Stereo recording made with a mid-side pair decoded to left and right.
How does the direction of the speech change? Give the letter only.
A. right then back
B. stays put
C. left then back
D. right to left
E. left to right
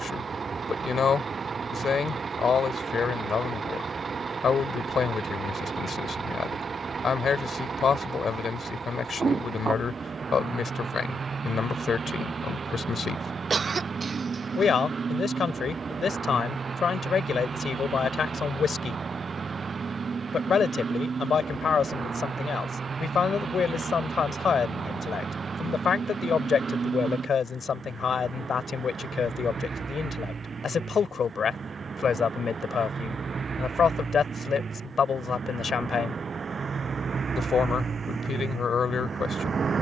B.